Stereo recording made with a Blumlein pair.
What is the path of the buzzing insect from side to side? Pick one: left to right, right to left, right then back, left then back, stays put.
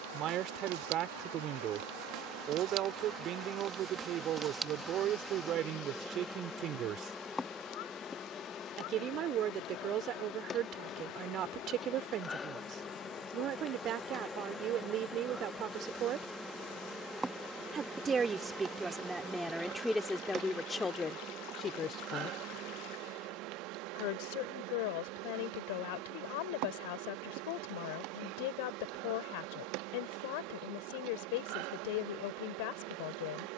left then back.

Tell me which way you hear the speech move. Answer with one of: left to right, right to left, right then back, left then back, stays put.
right to left.